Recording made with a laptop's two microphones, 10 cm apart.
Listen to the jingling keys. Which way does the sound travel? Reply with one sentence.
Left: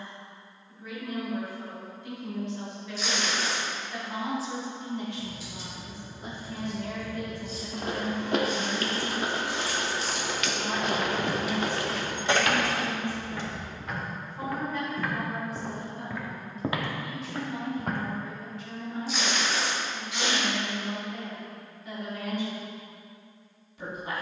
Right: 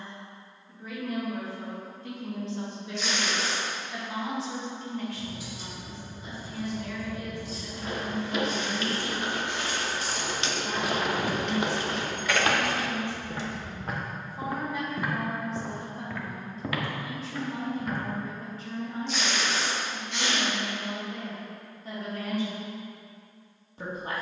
In this clip you hear the jingling keys move from right to left.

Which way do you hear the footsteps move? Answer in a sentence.
In this clip you hear the footsteps go right and come back.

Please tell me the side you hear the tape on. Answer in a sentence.
You can hear the tape in the centre.